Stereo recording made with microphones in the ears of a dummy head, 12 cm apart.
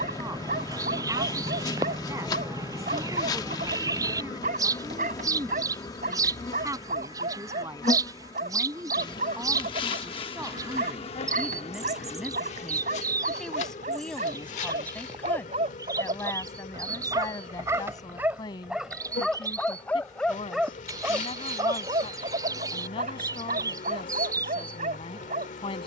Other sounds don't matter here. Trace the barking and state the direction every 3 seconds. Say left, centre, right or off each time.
right, right, right, right, right, right, centre, right, right.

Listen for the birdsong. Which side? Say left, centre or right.
right.